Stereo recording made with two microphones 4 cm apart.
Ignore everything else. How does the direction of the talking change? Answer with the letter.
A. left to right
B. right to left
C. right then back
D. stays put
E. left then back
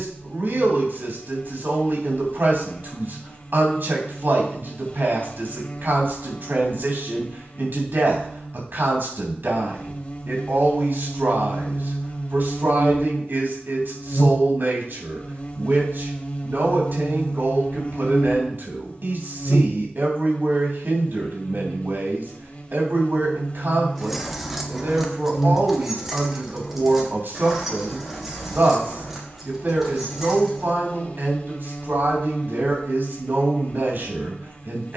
D.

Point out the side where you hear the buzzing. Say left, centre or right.
left.